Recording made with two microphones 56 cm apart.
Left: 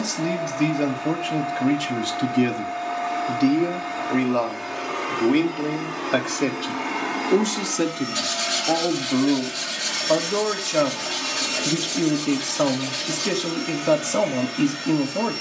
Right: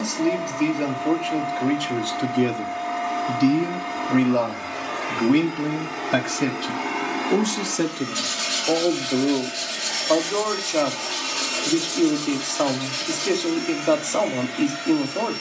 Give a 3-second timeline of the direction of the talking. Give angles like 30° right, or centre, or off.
30° left, 30° right, centre, 40° left, 40° left.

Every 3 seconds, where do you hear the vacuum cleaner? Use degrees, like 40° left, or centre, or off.
20° right, 20° right, centre, 30° left, 60° left.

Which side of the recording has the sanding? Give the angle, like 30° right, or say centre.
20° left.